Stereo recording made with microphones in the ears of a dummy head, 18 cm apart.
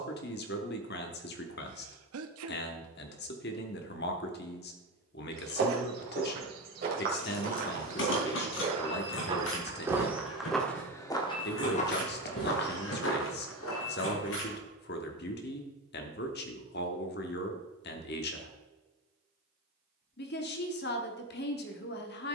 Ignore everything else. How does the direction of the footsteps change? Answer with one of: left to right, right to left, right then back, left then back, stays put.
right to left.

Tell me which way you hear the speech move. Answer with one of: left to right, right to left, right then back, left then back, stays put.
stays put.